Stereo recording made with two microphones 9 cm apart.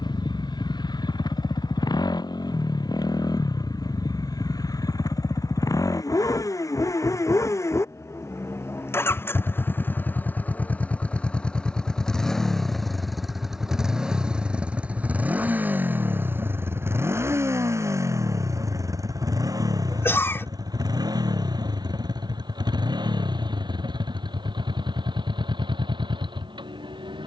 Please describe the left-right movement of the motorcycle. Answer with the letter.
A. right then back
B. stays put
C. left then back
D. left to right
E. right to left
D.